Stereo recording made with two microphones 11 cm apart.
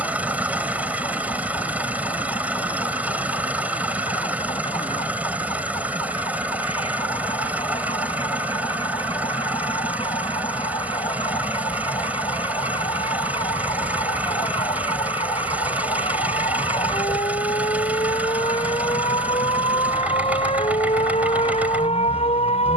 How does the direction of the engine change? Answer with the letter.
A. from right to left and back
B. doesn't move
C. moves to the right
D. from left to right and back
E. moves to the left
B.